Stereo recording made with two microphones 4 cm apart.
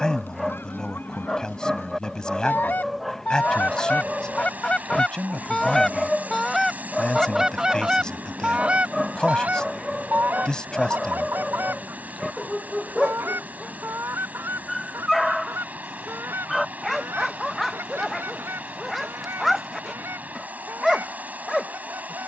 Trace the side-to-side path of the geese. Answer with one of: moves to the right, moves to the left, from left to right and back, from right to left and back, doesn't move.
moves to the right.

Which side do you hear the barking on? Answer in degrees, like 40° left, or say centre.
centre.